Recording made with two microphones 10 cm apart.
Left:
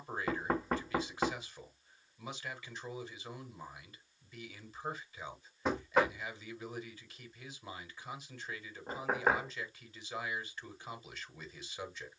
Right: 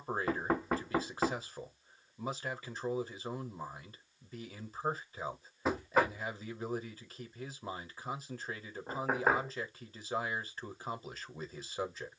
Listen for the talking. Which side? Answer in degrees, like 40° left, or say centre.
40° right.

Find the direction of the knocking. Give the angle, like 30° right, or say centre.
centre.